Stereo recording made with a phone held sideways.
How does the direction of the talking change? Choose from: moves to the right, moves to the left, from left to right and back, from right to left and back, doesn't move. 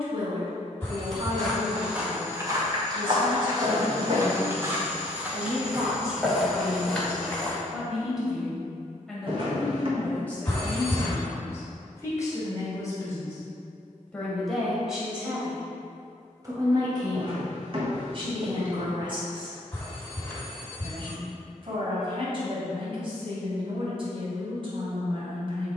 from right to left and back.